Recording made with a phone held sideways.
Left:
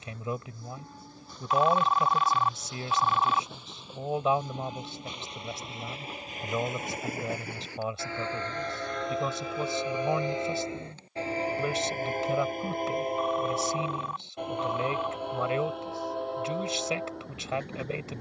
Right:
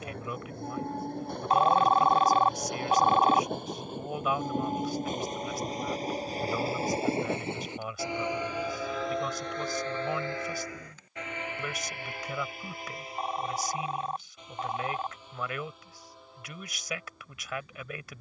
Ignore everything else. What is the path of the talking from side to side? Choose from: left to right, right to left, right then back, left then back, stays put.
stays put.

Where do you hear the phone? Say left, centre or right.
right.